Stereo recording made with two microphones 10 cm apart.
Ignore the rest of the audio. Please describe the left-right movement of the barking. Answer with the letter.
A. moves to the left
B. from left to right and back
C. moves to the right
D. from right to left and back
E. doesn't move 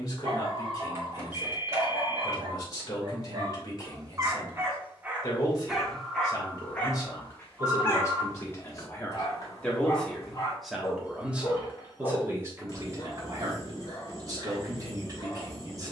A.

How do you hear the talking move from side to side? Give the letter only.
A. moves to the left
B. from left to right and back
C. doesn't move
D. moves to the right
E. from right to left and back
D.